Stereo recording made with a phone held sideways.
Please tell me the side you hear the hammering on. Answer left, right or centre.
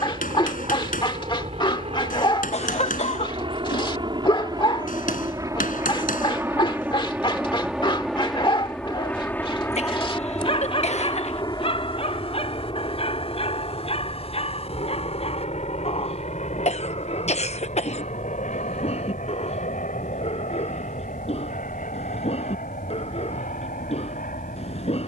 left.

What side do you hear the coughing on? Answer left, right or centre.
left.